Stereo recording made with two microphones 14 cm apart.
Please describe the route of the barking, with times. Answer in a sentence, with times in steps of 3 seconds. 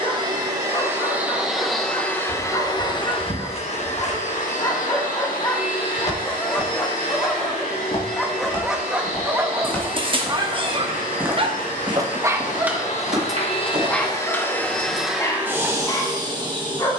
In this clip you hear the barking on the left from 0 s, in the centre from 6 s, on the right from 9 s, in the centre from 12 s and on the left from 15 s.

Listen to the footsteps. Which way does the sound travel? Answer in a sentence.
You can hear the footsteps move from left to right.